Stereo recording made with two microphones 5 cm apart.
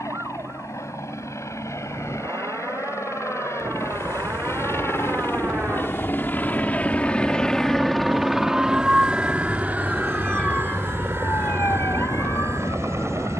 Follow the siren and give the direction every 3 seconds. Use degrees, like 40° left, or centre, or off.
50° right, 50° right, 30° right, 20° left, 70° left.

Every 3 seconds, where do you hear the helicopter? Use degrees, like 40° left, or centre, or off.
70° left, 60° left, 10° left, 40° right, 50° right.